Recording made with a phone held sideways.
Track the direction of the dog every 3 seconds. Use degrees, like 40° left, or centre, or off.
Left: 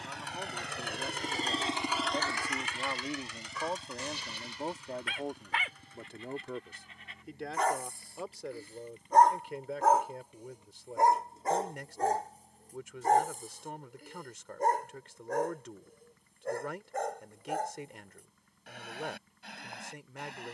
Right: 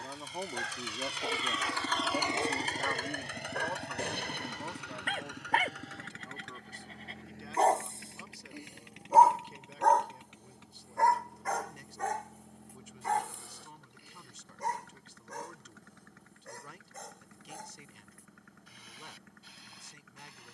70° right, 60° right, 30° right, 10° left, 50° left, 60° left, 70° left.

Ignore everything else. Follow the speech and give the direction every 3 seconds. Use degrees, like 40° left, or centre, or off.
10° right, 40° left, 70° left, 70° left, 70° left, 70° left, 70° left.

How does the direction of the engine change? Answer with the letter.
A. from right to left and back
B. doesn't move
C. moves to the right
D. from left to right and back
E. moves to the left
C.